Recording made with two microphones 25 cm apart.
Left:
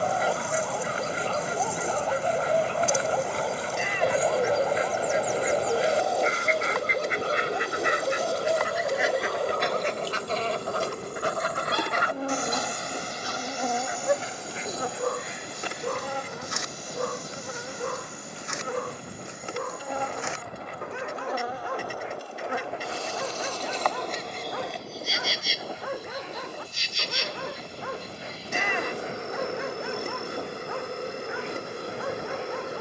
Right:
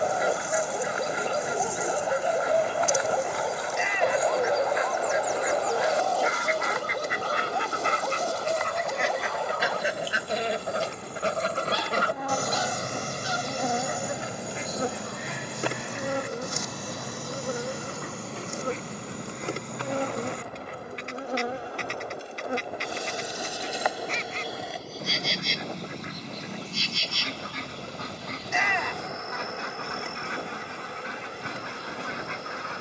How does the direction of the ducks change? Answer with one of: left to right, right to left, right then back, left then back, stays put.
left to right.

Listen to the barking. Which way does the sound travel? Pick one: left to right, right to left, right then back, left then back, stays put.
right to left.